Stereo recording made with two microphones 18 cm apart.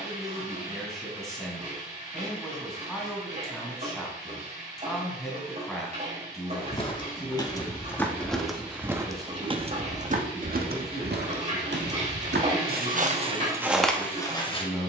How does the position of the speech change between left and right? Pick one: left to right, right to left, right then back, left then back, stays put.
stays put.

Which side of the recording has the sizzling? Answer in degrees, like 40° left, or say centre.
30° right.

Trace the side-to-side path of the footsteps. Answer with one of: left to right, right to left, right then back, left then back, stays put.
right then back.